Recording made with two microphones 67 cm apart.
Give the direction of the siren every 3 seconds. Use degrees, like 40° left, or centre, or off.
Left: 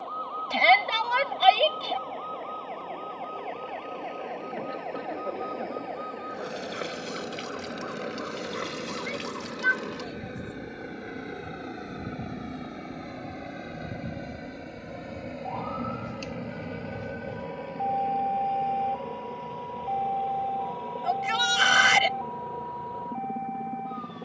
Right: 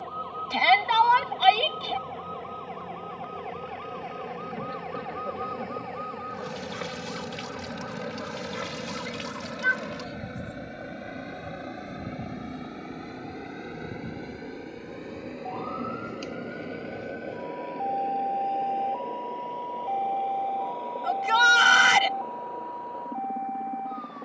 50° right, 40° right, 30° right, 10° right, 10° left, 30° left, 40° left, 50° left.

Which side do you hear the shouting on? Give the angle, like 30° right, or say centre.
10° left.